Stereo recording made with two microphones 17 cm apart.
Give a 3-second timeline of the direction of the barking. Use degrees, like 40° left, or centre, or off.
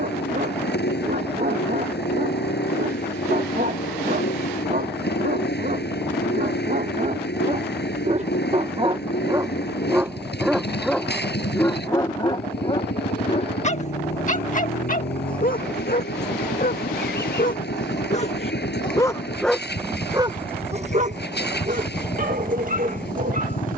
60° right, 60° right, 50° right, centre, 40° left, 60° left, centre, 50° right.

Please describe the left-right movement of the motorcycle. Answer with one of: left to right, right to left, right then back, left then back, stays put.
stays put.